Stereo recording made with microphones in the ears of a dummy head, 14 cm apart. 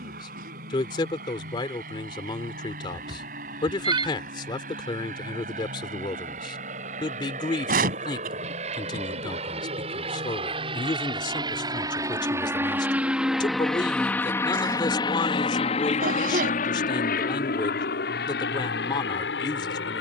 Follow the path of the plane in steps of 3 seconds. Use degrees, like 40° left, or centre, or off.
60° right, 60° right, 50° right, 30° right, centre, 50° left, 70° left.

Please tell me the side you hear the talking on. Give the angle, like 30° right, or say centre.
30° left.